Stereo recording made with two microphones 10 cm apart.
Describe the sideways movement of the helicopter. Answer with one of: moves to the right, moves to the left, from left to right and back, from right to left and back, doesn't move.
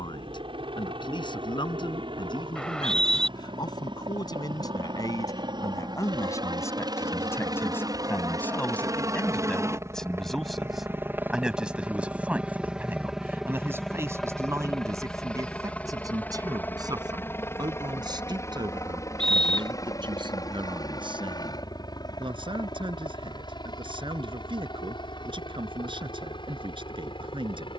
moves to the left.